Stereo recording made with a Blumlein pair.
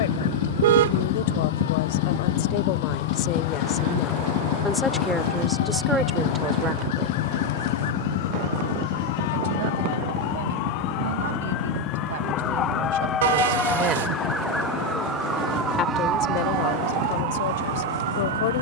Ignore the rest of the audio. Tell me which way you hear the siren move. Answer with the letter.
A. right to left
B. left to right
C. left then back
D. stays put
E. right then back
B.